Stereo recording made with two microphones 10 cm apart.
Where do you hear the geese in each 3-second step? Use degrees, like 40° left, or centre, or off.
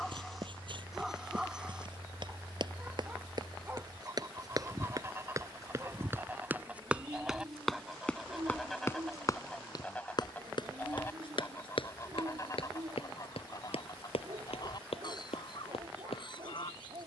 50° right, 30° right, 10° right, 20° left, 40° left, 50° left.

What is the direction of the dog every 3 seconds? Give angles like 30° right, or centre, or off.
10° right, 20° right, 40° right, 40° right, 50° right, 50° right.